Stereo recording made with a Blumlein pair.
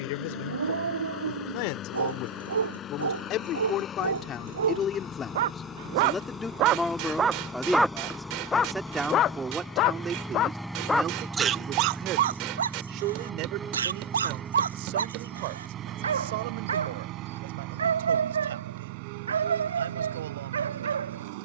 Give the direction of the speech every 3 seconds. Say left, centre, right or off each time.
left, left, centre, right, right, right, right.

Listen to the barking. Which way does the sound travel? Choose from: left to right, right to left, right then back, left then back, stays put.
left then back.